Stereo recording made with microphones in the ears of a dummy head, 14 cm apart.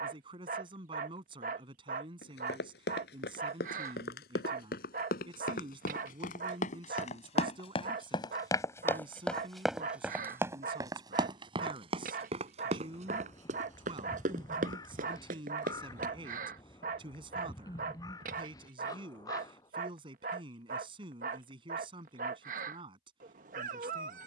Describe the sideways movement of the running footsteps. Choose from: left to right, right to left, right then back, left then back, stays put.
left to right.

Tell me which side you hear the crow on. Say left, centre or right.
left.